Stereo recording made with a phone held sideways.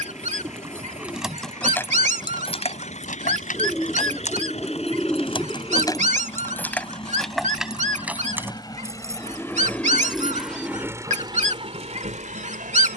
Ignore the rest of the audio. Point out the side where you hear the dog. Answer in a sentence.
You can hear the dog on the right.